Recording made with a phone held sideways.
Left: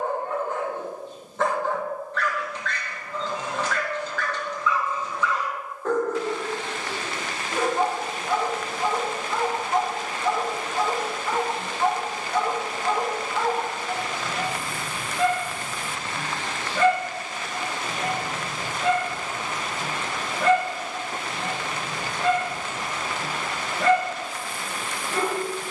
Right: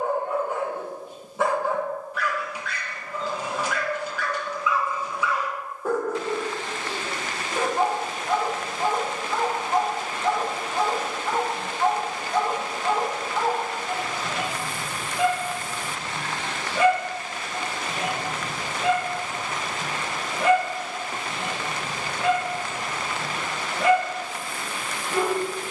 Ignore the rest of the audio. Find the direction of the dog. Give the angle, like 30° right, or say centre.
10° right.